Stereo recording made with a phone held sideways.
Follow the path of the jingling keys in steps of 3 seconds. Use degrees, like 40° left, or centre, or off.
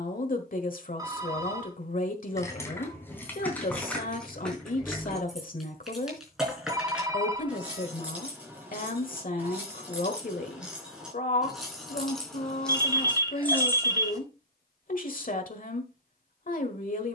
20° left, 10° left, 10° right, 10° right, 10° left, off.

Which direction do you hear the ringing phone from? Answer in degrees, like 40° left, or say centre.
20° right.